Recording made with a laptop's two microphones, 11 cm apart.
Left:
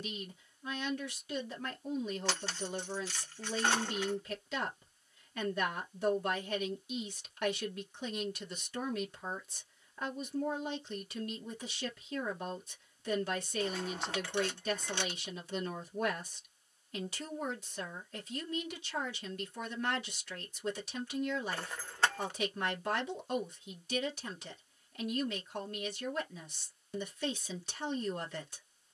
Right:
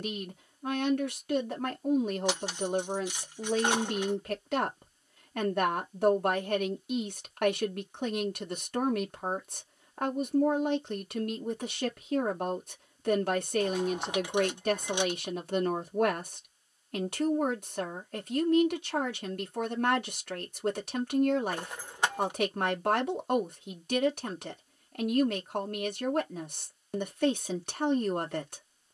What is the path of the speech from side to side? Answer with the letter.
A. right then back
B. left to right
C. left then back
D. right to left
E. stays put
E.